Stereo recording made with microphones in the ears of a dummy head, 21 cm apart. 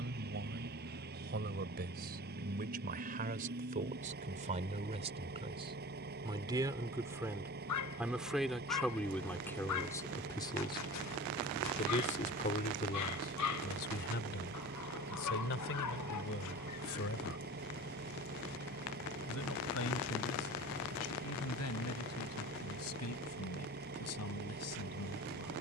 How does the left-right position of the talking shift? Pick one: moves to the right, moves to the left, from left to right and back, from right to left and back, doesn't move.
moves to the left.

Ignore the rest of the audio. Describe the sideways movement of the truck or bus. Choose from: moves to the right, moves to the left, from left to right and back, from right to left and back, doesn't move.
doesn't move.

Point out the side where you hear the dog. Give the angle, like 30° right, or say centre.
80° left.